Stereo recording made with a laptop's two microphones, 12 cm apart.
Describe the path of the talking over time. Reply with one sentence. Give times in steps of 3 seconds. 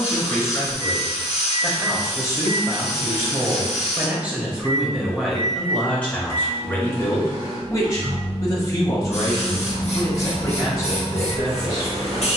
You can hear the talking in the centre from 0 s and on the left from 6 s.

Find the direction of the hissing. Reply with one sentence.
In this clip you hear the hissing on the left.